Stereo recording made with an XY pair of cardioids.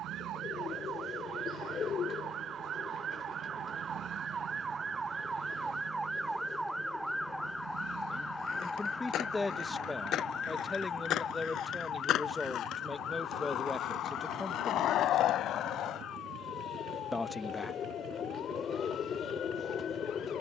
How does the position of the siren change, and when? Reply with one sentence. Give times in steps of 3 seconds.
You can hear the siren on the right from 0 s, in the centre from 6 s and on the left from 9 s.